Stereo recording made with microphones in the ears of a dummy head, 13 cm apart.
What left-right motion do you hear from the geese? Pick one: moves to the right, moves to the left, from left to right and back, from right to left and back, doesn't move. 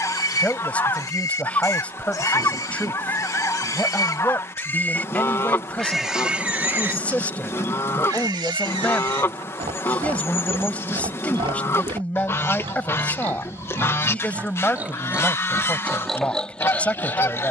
doesn't move.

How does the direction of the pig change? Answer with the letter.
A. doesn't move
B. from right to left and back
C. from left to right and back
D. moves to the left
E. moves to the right
C.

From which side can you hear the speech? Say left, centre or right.
centre.